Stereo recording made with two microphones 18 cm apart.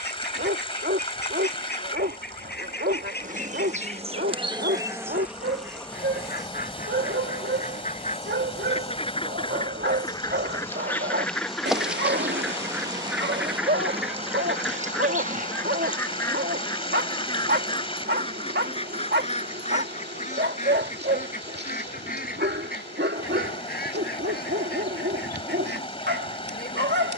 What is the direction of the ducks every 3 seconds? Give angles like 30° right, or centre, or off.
70° left, 60° left, 50° left, 20° left, centre, 20° left, 40° left, 60° left, 60° left.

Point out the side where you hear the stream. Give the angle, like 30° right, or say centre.
30° left.